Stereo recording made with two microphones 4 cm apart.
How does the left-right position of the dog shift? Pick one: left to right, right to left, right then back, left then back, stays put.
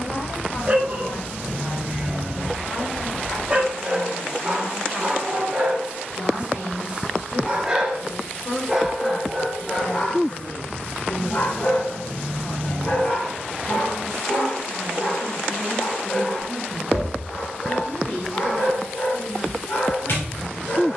right to left.